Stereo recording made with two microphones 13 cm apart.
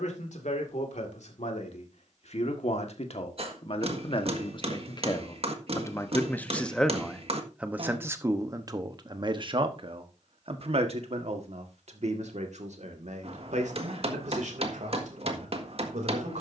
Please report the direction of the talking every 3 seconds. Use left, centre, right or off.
left, left, centre, right, right, right.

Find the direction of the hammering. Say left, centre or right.
right.